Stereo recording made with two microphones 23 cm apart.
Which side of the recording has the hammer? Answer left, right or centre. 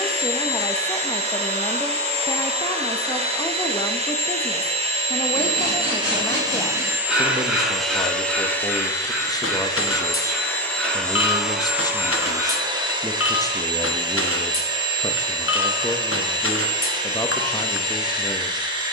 left.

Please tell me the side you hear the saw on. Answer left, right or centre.
centre.